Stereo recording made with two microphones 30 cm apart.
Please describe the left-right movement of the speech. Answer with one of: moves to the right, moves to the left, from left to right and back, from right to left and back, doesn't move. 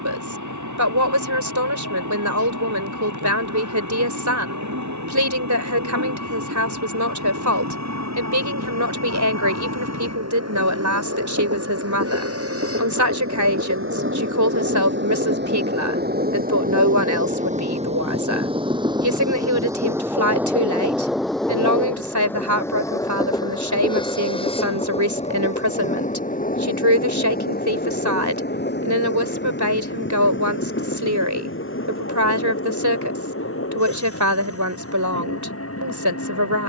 doesn't move.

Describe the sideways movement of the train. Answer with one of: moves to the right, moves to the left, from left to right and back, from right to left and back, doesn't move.
moves to the left.